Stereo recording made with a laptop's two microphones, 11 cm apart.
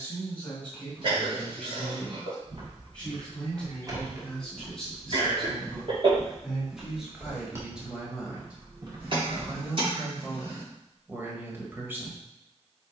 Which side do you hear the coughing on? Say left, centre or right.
right.